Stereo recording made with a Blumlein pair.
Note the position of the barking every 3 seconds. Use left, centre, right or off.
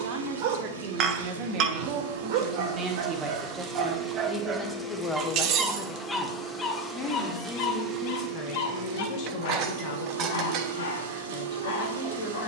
right, right, left, left.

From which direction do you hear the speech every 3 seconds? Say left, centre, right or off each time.
right, centre, left, left.